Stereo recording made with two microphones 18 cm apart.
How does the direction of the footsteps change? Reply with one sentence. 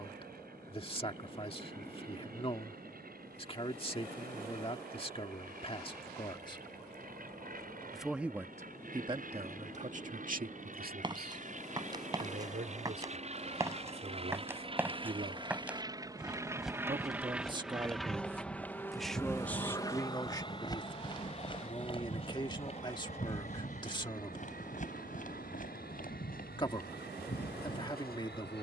You can hear the footsteps travel towards the left.